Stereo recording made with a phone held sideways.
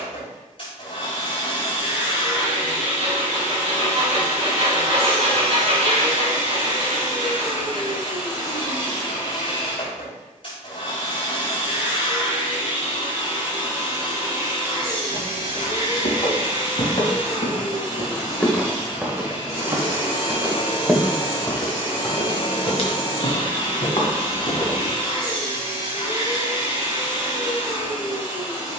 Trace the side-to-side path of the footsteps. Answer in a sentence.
You can hear the footsteps move from left to right and back again.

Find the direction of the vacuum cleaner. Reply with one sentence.
In this clip you hear the vacuum cleaner on the left.